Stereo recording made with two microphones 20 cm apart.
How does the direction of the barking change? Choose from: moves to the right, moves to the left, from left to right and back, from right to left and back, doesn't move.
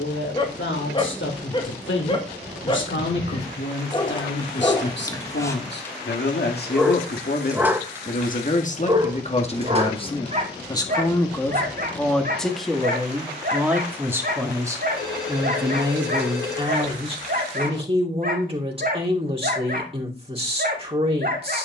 moves to the right.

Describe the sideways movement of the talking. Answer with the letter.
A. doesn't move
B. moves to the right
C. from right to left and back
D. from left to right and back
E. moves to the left
B.